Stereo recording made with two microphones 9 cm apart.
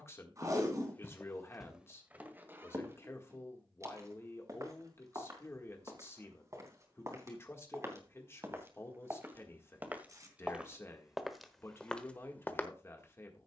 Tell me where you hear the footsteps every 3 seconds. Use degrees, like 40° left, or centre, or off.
10° right, 40° right, 30° right, 10° right, 20° left.